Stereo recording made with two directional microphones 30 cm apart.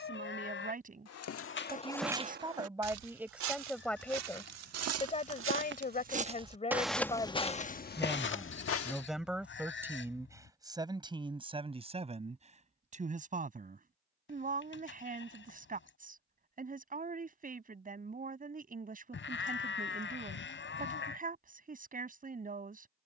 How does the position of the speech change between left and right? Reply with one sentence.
You can hear the speech go left and come back.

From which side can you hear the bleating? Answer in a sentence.
In this clip you hear the bleating on the left.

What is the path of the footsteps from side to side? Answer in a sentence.
You can hear the footsteps move from left to right and back again.